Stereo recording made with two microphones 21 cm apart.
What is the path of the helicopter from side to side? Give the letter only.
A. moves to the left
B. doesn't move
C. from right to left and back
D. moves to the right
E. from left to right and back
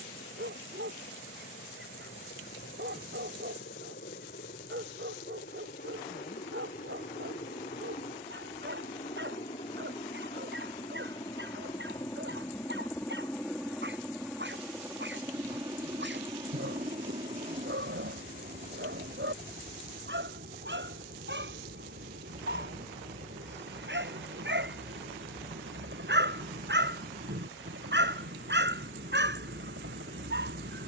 D.